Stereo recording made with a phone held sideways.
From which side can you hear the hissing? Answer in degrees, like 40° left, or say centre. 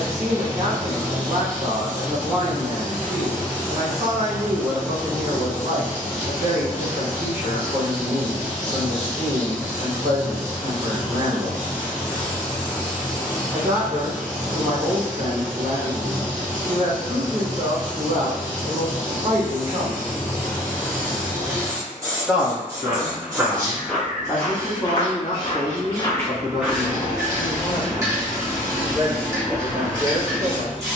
20° right.